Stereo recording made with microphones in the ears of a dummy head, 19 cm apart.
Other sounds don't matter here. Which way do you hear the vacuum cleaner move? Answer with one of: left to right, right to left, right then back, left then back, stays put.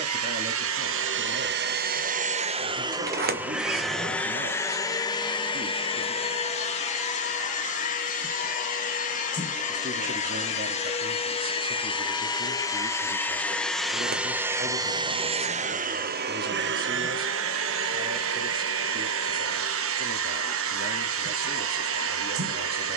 left then back.